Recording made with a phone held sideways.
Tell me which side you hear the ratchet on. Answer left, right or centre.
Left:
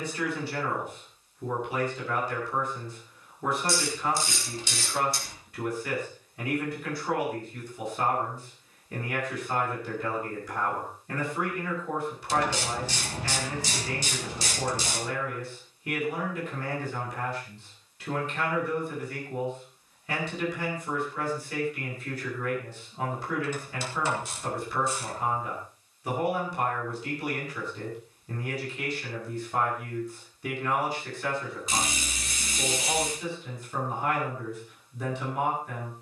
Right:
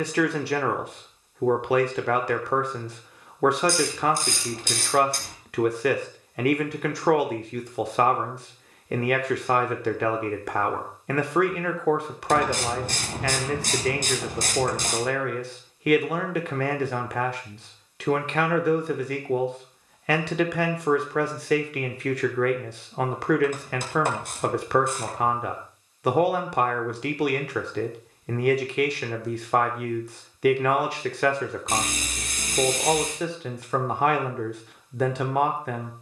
right.